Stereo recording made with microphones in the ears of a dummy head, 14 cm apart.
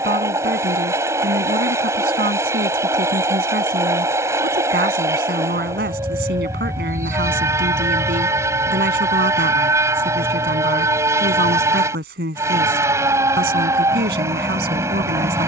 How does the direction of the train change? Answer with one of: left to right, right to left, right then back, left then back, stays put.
stays put.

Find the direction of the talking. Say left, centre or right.
right.